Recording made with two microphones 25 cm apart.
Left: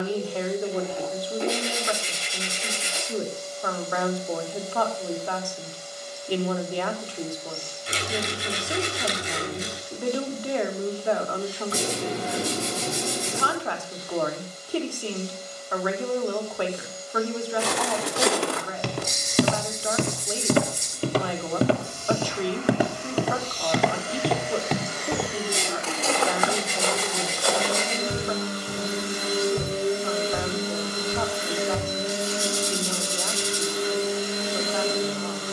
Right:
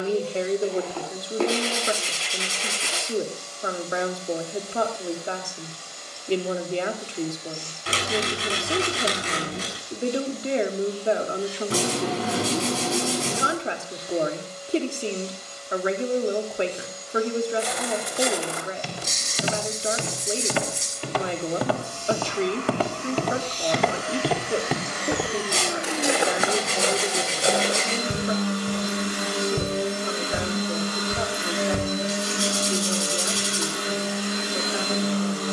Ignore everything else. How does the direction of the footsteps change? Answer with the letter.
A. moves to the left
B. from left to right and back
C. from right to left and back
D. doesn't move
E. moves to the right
E.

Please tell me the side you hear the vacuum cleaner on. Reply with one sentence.
You can hear the vacuum cleaner on the right.